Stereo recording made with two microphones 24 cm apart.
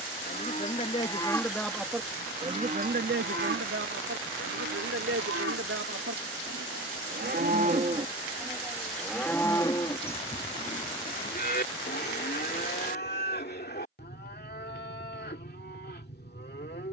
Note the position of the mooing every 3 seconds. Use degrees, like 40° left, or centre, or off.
centre, 60° right, 30° right, 30° left, 40° left, 40° left.